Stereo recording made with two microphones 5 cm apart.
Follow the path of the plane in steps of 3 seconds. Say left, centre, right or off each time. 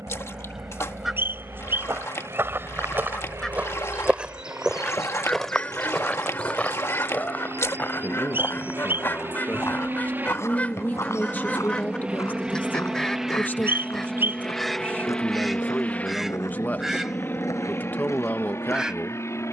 right, right, right, right, centre, left, left.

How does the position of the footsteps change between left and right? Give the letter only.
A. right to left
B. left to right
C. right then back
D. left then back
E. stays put
A.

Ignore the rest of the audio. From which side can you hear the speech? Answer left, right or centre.
left.